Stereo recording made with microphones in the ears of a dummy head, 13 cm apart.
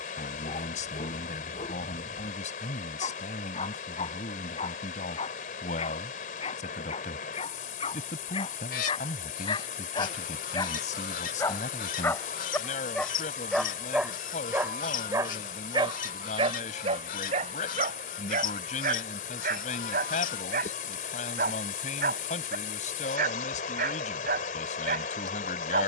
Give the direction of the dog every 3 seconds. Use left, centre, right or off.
left, left, left, left, centre, right, right, right, right.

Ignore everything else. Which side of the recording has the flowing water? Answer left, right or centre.
left.